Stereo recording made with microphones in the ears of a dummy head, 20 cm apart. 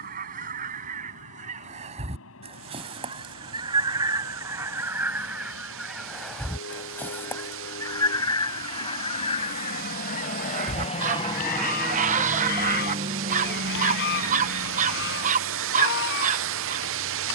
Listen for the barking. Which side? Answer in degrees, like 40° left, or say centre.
30° right.